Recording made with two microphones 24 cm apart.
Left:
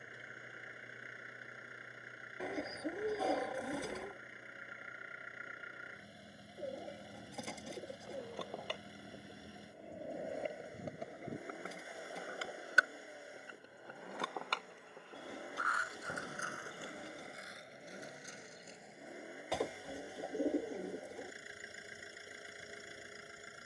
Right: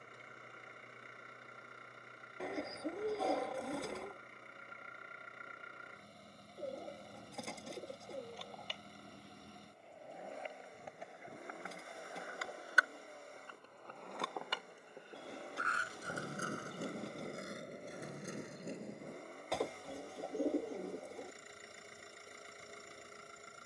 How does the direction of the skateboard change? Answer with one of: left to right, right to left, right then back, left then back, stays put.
left to right.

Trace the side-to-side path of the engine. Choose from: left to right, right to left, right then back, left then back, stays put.
stays put.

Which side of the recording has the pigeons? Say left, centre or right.
centre.